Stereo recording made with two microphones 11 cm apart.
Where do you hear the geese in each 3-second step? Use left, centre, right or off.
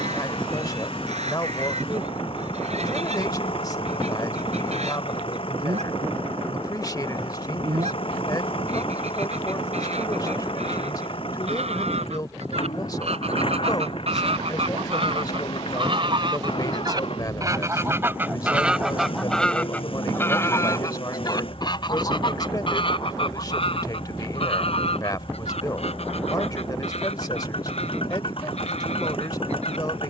right, right, right, right, right, right, centre, left, left, left.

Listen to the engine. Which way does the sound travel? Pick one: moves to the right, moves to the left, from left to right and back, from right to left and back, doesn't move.
doesn't move.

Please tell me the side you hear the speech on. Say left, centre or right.
left.